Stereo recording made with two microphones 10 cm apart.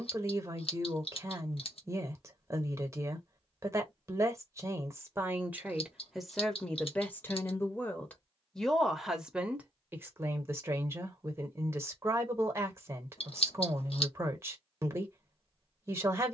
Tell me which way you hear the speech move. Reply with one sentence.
You can hear the speech move from right to left and back again.